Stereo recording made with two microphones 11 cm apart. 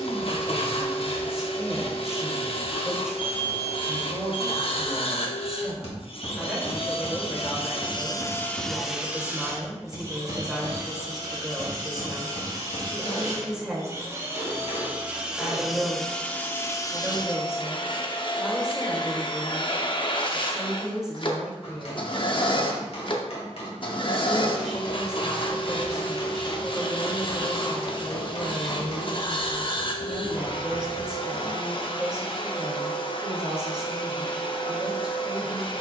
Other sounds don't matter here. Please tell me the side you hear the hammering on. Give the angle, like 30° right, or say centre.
70° left.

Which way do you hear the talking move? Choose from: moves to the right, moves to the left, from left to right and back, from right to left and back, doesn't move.
doesn't move.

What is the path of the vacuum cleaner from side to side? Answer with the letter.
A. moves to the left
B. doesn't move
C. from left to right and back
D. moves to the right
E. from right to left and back
C.